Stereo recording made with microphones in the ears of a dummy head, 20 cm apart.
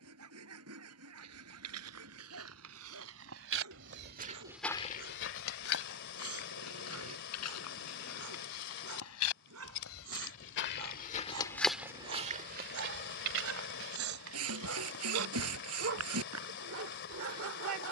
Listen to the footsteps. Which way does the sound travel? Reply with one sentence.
You can hear the footsteps move from right to left and back again.